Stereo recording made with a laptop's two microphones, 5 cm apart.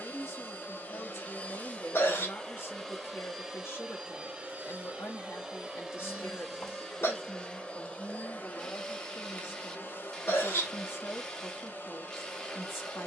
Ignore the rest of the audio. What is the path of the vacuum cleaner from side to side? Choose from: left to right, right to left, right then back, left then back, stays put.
right then back.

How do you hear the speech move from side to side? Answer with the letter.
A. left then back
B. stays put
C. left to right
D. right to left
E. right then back
B.